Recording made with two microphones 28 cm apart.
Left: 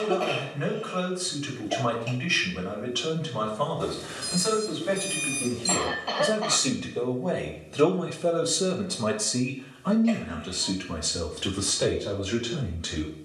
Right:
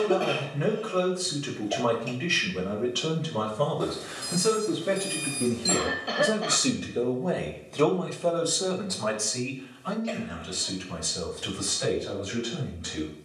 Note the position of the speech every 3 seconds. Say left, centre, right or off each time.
right, right, centre, left, left.